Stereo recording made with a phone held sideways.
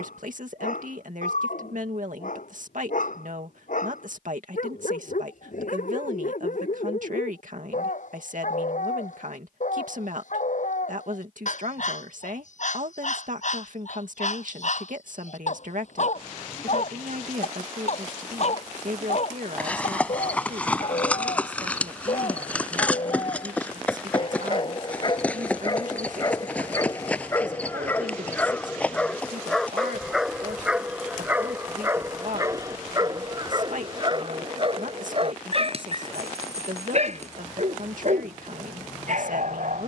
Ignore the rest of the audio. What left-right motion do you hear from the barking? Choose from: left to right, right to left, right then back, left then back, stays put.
left to right.